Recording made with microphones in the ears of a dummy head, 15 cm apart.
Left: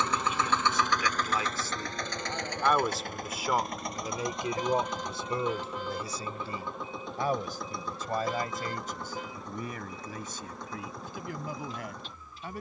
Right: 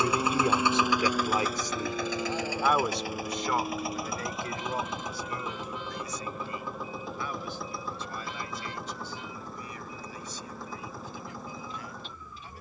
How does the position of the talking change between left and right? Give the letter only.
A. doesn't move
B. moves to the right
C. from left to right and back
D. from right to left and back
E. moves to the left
E.